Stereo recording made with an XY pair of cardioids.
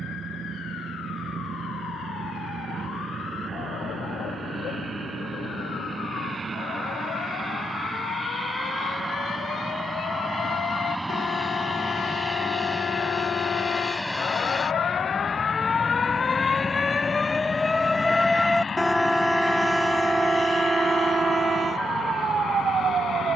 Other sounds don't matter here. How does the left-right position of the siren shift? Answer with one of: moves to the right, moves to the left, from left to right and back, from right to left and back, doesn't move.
moves to the right.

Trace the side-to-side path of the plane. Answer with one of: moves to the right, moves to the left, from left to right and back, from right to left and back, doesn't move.
moves to the left.